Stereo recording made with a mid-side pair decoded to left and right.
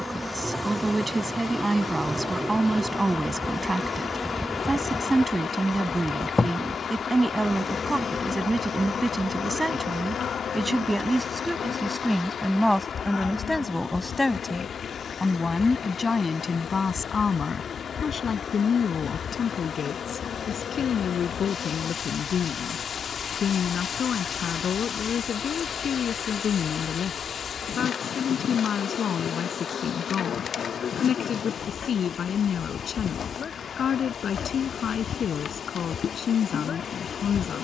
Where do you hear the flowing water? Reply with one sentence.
You can hear the flowing water on the left.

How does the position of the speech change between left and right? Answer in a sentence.
You can hear the speech move to the left.